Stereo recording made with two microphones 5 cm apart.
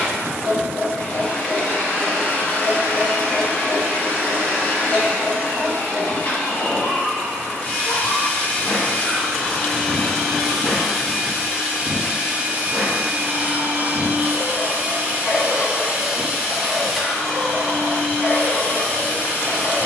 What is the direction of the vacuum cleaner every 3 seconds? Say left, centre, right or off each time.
left, left, left, centre, right, centre, left.